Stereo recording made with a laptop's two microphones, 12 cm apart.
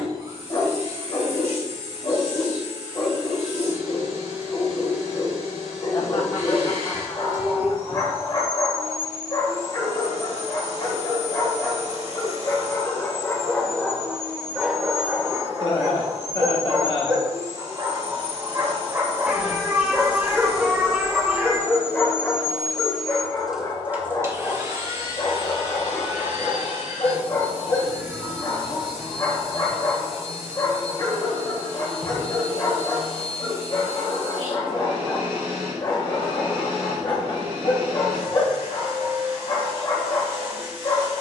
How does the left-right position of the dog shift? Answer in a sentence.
In this clip you hear the dog move from left to right and back again.